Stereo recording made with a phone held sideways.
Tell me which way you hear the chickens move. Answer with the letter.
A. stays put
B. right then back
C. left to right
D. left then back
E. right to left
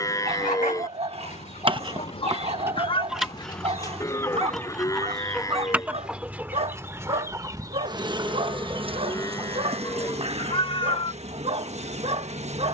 C.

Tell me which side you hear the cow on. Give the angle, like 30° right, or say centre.
20° left.